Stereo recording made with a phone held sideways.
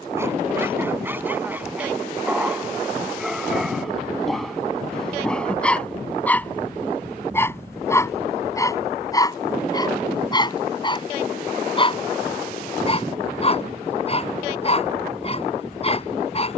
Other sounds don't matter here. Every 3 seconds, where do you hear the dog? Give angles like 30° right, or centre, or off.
10° right, centre, 10° left, 30° left, 40° left, 40° left.